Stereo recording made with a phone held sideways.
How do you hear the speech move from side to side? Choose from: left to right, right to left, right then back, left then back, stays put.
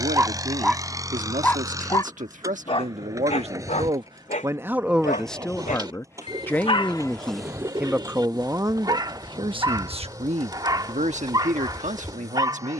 left then back.